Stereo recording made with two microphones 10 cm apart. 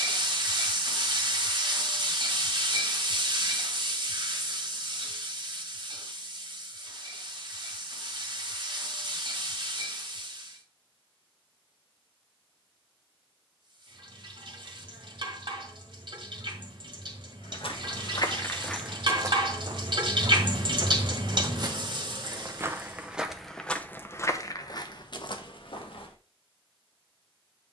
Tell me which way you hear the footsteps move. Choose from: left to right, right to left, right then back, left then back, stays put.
right then back.